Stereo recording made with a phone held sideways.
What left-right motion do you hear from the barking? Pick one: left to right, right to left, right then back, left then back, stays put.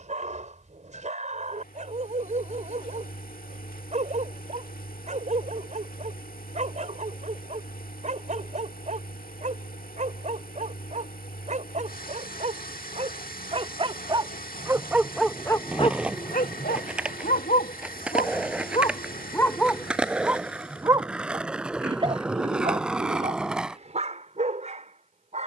left then back.